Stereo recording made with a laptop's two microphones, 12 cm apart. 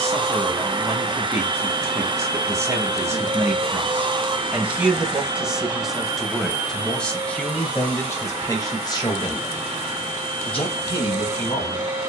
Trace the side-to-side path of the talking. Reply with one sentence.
You can hear the talking move to the left.